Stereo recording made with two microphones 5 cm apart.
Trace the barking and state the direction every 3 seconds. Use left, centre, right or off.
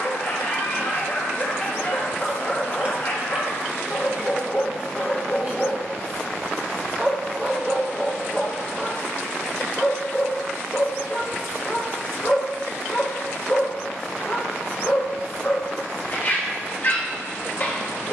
left, left, centre, left, left, left.